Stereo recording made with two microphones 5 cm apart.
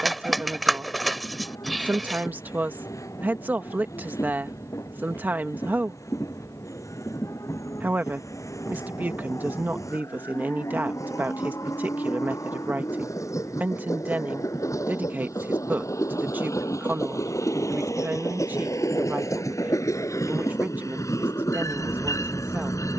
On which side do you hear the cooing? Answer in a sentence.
In this clip you hear the cooing in the centre.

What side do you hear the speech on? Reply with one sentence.
In this clip you hear the speech on the right.